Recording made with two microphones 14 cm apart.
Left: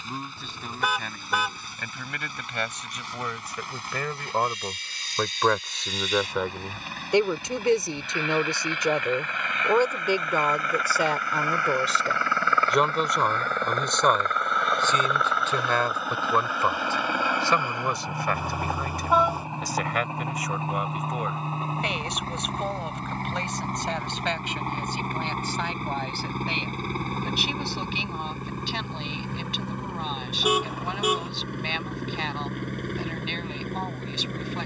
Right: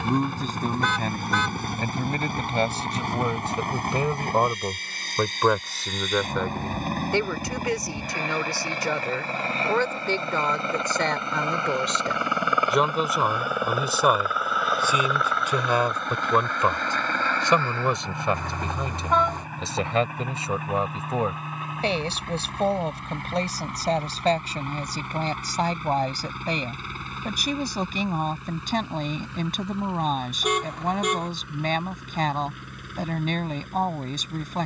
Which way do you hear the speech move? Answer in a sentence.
In this clip you hear the speech go left and come back.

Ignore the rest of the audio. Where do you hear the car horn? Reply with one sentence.
In this clip you hear the car horn in the centre.